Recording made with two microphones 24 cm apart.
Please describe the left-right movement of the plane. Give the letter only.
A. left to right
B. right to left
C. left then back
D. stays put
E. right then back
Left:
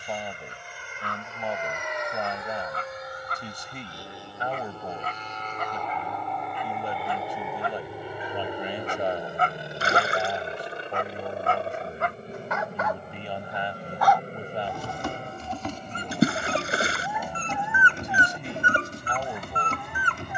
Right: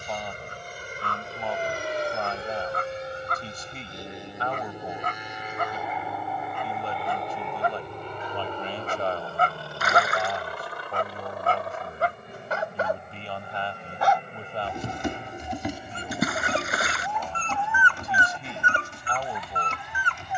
B.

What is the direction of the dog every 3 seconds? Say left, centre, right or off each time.
right, right, right, right, right, centre, left.